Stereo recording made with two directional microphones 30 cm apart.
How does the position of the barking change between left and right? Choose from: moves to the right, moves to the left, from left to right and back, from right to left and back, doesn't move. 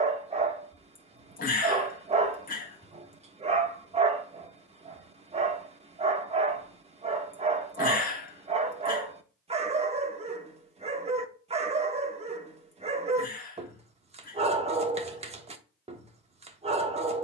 doesn't move.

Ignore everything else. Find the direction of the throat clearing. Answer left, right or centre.
left.